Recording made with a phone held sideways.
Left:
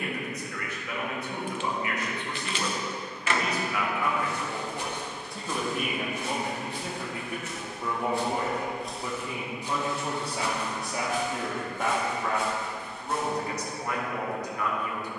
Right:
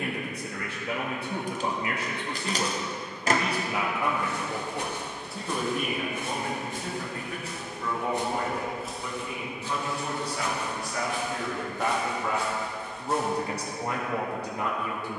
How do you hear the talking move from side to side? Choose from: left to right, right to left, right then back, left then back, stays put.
left then back.